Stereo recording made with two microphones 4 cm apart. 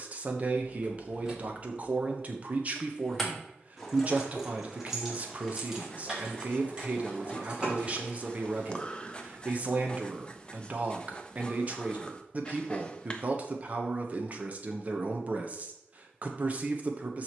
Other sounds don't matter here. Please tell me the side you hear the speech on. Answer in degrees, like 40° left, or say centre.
40° right.